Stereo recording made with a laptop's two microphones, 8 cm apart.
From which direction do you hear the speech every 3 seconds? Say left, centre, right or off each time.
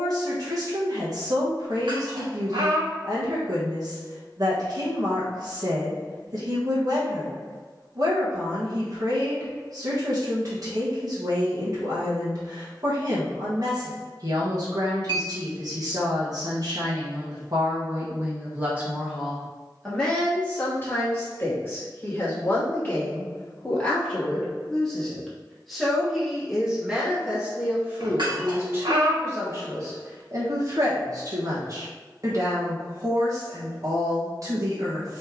right, right, right, right, right, right, centre, left, centre, right, right, right.